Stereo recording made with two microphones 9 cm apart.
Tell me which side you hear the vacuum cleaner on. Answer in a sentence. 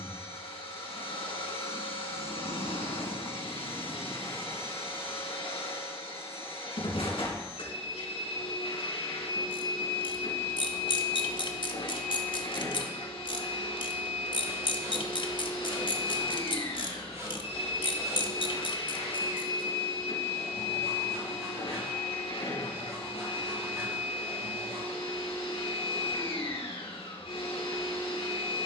You can hear the vacuum cleaner on the left.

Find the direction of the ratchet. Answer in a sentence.
In this clip you hear the ratchet on the left.